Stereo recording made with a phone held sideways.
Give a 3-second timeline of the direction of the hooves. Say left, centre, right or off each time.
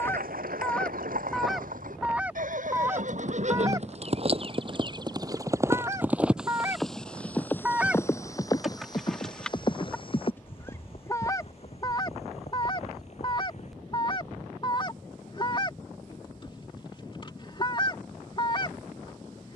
right, right, centre, left, left, off, off.